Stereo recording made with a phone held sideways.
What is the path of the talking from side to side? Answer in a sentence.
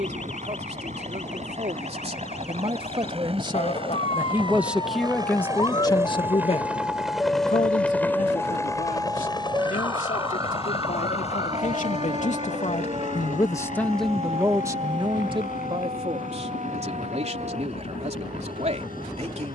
You can hear the talking move from right to left and back again.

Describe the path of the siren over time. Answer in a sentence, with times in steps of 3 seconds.
You can hear the siren on the left from 0 s, in the centre from 6 s and on the right from 9 s.